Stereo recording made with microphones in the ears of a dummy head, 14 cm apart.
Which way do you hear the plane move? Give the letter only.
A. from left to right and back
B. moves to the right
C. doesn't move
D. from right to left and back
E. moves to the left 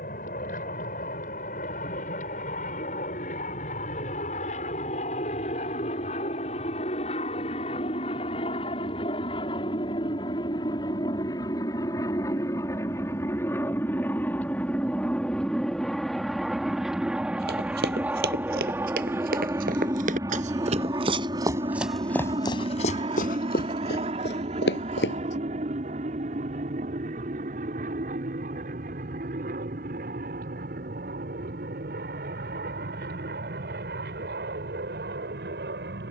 B.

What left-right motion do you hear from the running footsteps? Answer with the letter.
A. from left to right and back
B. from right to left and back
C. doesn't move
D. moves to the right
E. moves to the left
E.